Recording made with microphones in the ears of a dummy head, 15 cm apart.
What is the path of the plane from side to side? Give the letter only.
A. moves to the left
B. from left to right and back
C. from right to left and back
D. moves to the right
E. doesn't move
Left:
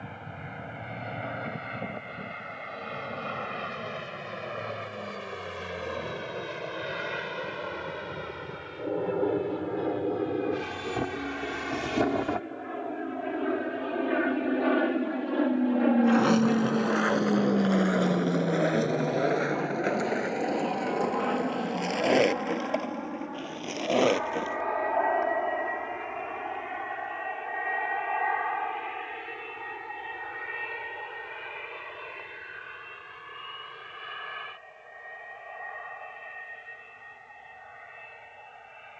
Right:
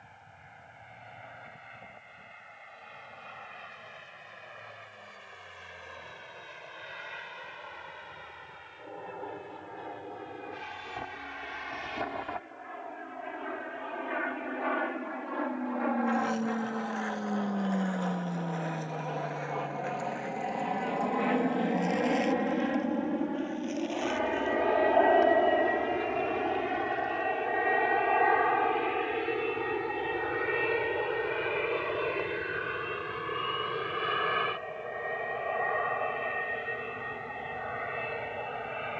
D.